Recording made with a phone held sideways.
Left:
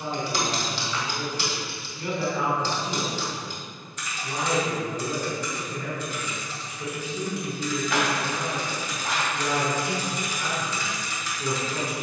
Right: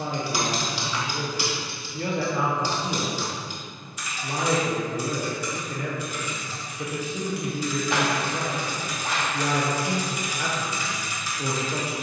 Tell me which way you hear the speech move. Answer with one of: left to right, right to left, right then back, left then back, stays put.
stays put.